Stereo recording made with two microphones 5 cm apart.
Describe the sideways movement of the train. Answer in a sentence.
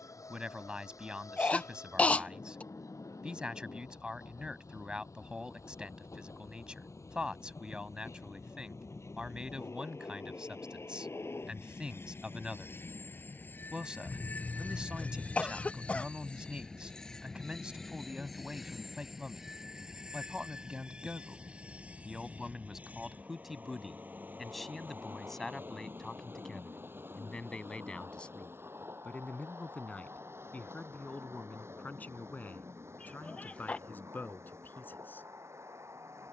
In this clip you hear the train move from left to right.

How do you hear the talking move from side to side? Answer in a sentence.
You can hear the talking move from right to left.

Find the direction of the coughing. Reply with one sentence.
In this clip you hear the coughing on the left.